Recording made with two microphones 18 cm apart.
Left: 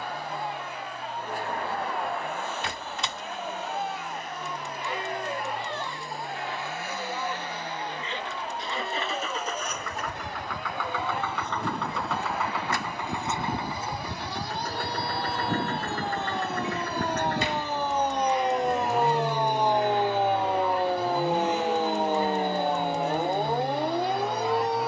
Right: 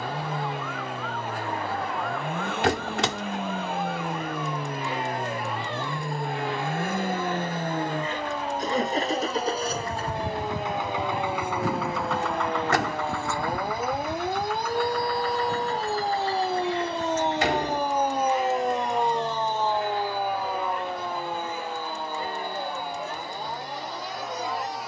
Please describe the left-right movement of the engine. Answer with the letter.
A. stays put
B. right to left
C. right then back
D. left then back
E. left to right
B.